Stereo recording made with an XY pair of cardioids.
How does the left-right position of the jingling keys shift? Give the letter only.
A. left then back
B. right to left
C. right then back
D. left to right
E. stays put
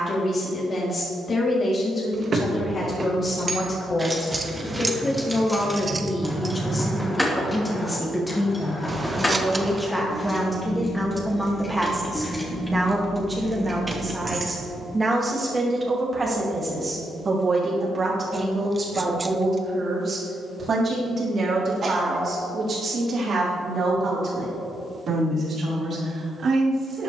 A.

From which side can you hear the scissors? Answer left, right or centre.
right.